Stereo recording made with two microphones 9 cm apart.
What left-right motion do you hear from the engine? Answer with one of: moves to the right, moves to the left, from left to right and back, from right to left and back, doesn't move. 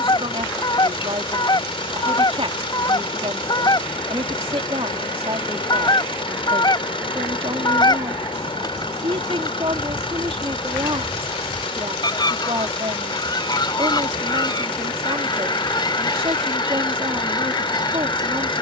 doesn't move.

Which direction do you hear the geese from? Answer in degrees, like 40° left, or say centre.
50° left.